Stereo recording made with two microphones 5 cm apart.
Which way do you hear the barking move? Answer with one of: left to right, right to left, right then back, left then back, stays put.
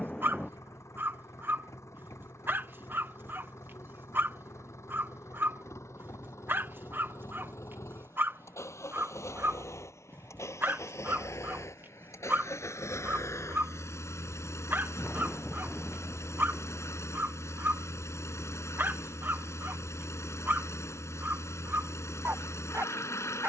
stays put.